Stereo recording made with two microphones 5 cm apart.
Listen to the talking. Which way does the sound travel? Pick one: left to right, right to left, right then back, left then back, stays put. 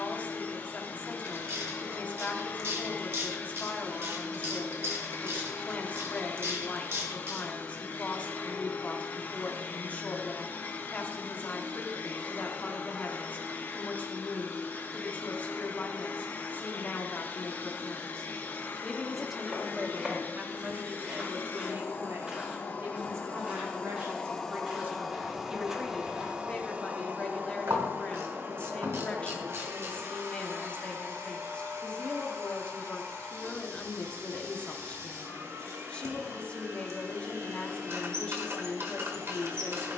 right then back.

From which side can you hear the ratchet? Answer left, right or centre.
right.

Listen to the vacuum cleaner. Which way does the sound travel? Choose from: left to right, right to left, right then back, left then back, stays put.
left to right.